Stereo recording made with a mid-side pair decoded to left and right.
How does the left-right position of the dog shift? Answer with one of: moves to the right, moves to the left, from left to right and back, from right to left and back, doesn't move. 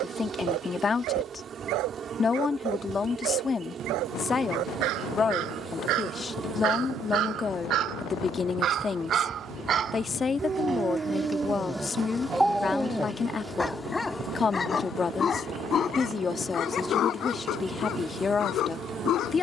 moves to the left.